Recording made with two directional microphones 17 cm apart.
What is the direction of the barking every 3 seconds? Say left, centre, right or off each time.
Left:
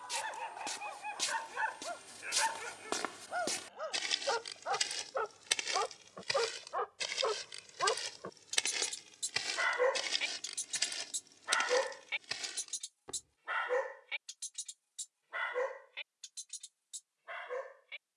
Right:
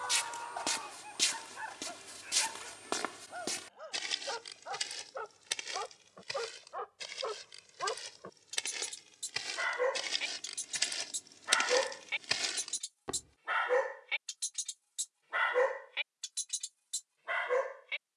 left, left, left, centre, right, right.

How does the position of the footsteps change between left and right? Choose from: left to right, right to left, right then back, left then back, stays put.
left then back.